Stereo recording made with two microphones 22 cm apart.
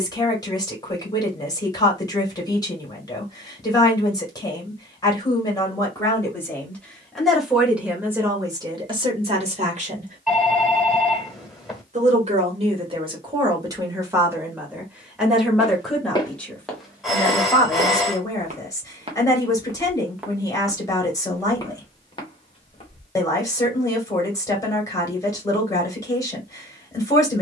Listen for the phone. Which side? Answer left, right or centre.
centre.